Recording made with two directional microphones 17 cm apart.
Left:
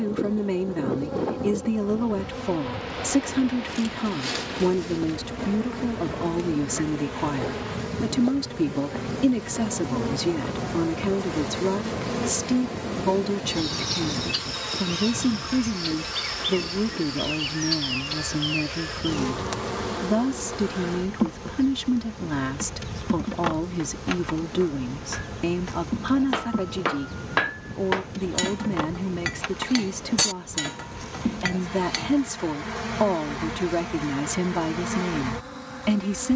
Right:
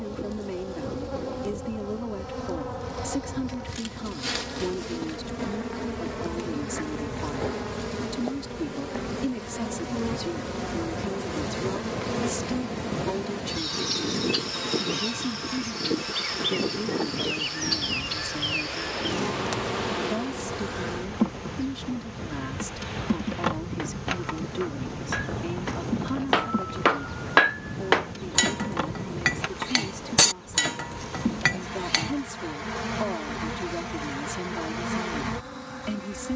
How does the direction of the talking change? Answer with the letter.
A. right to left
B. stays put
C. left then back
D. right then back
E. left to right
B.